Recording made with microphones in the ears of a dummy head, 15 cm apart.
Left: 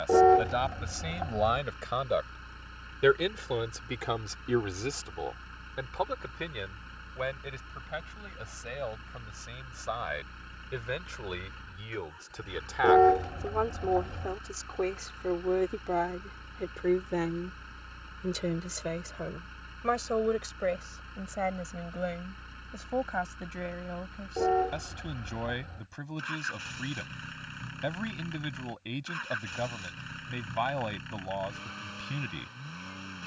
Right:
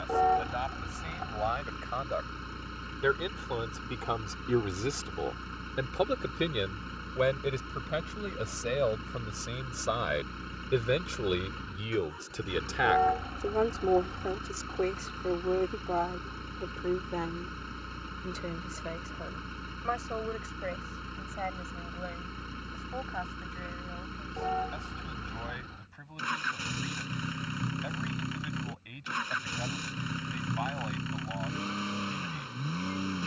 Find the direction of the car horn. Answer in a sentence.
You can hear the car horn on the left.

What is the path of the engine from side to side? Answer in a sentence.
In this clip you hear the engine stay put.